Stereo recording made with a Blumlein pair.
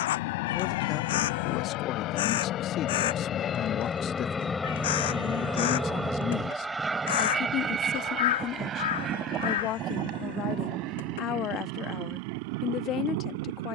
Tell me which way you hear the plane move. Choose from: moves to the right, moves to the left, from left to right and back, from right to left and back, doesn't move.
moves to the right.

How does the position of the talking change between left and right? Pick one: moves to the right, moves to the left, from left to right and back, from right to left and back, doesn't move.
doesn't move.